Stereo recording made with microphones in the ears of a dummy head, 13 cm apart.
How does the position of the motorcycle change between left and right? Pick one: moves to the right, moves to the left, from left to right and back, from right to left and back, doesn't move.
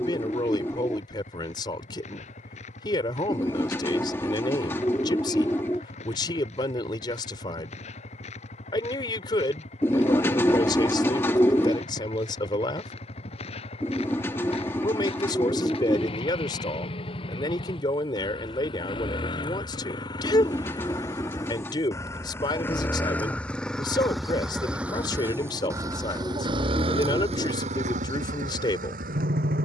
moves to the right.